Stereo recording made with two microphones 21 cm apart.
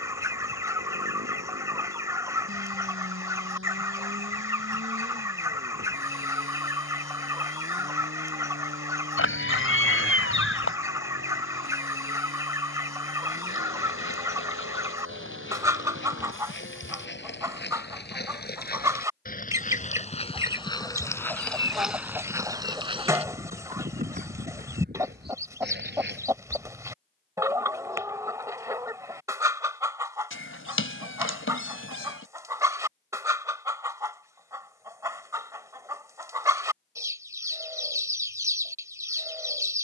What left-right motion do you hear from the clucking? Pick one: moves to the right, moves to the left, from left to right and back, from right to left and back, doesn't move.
doesn't move.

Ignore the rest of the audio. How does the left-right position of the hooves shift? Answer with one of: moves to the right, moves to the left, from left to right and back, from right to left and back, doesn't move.
moves to the right.